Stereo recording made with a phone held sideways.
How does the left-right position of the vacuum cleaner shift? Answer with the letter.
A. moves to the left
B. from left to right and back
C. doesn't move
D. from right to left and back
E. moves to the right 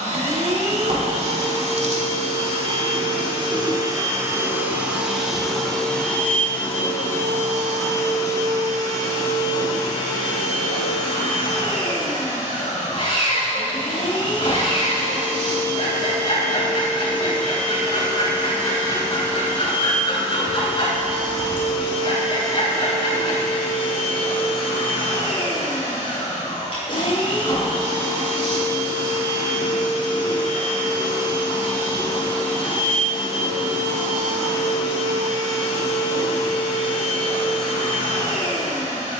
A.